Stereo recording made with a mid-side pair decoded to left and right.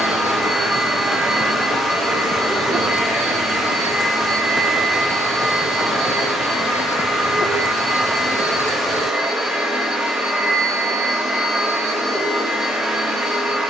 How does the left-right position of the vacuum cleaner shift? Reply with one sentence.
In this clip you hear the vacuum cleaner stay in one place.